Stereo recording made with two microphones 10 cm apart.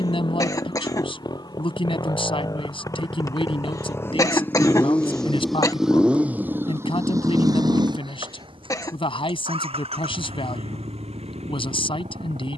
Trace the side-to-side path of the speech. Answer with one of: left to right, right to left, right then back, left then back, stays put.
stays put.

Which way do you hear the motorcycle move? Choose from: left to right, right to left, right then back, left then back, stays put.
left to right.